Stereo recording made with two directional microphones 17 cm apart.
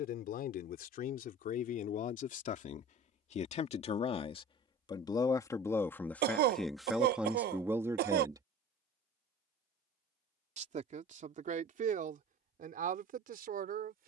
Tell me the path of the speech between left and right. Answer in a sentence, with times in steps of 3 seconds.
You can hear the speech on the left from 0 s, in the centre from 6 s and on the right from 9 s.